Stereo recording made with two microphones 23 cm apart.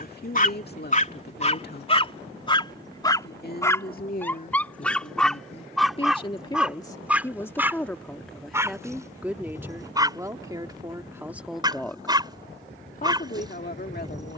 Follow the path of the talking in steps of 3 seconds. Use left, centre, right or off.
left, left, centre, centre, left.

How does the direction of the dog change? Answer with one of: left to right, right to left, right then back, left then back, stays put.
left to right.